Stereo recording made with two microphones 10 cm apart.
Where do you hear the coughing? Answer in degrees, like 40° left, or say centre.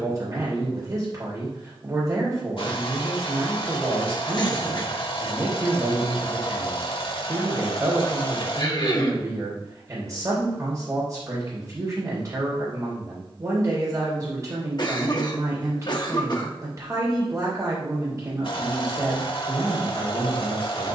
50° left.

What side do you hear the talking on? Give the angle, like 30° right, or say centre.
40° right.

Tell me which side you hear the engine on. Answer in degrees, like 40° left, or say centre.
70° left.